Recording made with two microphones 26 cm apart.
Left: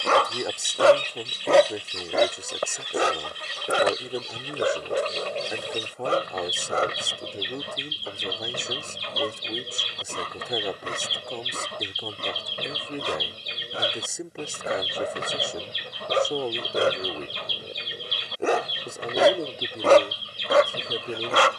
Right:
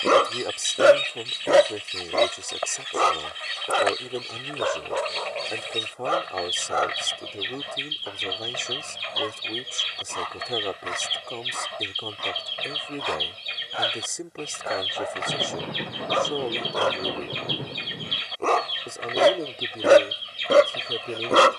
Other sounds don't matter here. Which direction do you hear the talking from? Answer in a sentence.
You can hear the talking in the centre.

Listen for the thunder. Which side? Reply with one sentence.
You can hear the thunder on the right.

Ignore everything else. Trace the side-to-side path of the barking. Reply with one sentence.
In this clip you hear the barking go left and come back.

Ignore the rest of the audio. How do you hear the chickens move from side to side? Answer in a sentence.
You can hear the chickens stay in one place.